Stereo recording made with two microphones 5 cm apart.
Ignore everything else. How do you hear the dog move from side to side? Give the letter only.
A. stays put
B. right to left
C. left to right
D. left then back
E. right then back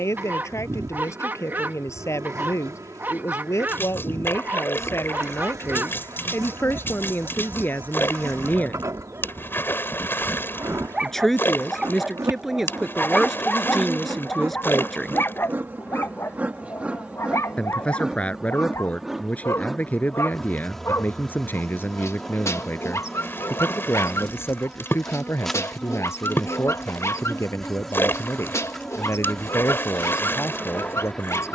B.